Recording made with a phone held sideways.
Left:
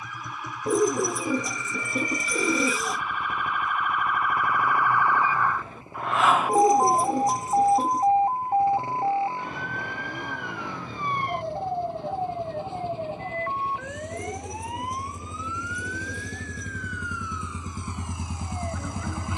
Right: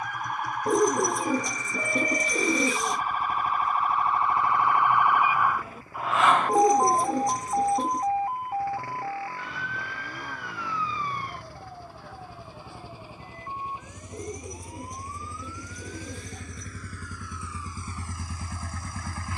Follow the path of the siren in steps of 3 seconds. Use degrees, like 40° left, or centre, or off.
50° right, 30° right, 20° left, 50° left, 70° left, 70° left, 80° left.